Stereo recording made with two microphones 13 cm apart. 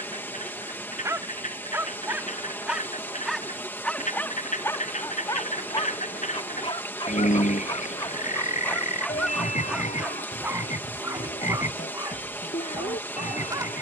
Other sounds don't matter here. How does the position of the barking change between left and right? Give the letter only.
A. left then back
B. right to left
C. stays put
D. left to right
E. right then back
A.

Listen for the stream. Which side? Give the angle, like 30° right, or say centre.
20° left.